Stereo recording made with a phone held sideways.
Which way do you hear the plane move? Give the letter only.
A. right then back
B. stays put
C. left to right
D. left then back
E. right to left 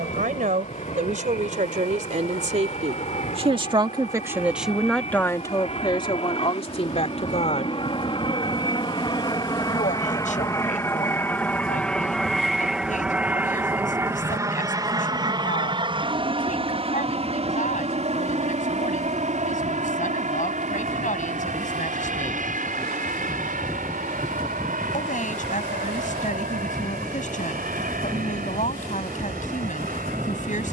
C.